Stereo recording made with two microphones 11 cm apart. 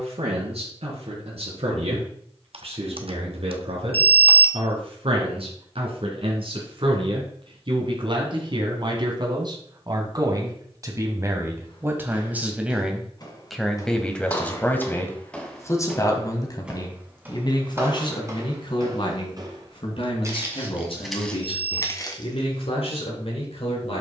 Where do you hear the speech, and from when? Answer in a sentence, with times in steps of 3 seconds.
You can hear the speech on the right from 0 s, in the centre from 12 s and on the left from 15 s.